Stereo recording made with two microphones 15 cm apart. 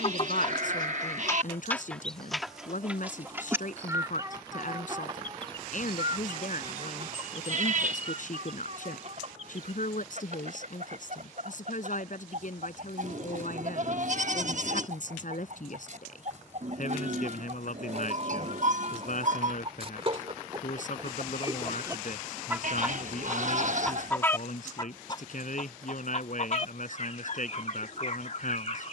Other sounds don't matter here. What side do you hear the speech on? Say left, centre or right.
left.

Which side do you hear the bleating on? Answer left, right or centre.
right.